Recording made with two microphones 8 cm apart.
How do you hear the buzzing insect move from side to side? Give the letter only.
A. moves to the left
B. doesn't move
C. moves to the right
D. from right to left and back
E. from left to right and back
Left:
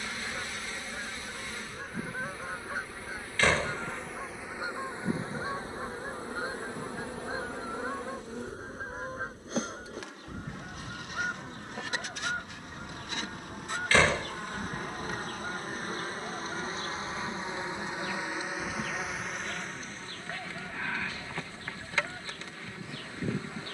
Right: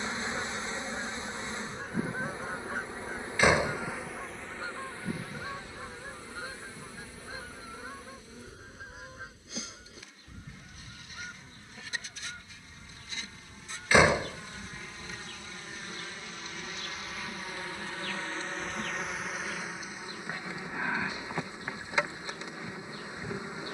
D.